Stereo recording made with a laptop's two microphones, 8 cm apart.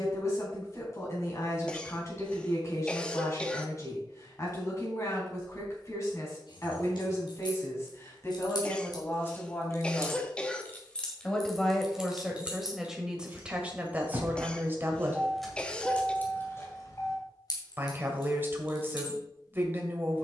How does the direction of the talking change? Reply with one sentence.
You can hear the talking move to the right.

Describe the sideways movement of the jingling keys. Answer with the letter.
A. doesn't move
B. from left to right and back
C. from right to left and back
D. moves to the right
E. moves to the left
B.